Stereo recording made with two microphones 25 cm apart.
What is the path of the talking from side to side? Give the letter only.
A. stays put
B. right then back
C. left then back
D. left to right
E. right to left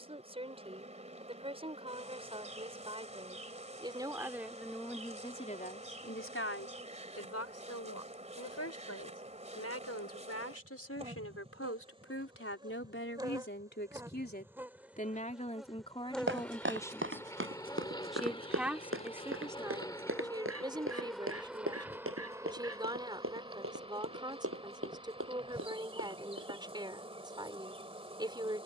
C.